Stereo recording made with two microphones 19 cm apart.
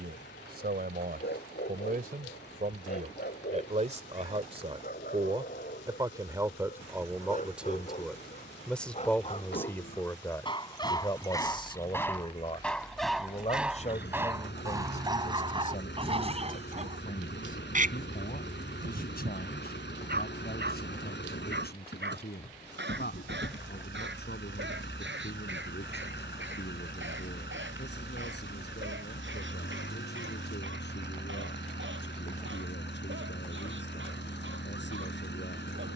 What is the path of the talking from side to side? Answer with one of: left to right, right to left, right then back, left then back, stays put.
right to left.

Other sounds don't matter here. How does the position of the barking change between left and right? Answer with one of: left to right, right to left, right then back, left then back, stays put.
left to right.